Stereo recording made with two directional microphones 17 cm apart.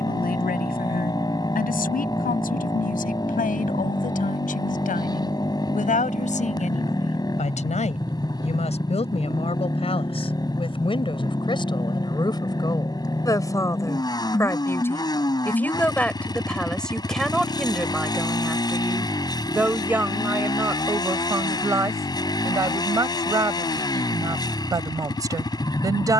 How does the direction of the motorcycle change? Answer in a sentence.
You can hear the motorcycle stay in one place.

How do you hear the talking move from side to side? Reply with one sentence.
You can hear the talking travel towards the right.